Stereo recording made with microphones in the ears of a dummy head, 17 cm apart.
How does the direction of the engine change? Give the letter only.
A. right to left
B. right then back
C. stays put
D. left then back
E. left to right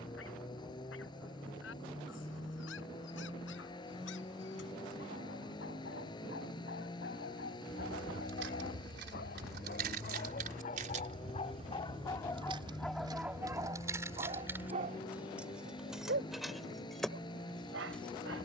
C.